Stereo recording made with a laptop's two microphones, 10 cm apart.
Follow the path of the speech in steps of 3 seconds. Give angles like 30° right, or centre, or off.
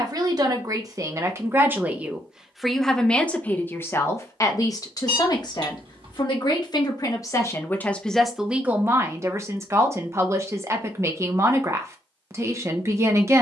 30° right, 30° left, 20° left, 30° right, 30° right.